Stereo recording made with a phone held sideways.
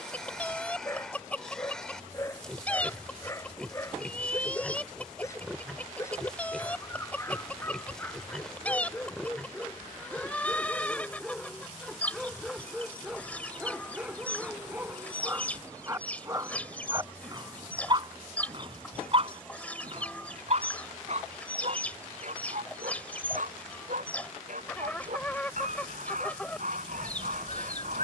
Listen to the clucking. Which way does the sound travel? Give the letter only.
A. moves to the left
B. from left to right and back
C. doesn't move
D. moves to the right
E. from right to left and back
C.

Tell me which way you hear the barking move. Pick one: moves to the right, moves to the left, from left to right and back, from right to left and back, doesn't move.
moves to the right.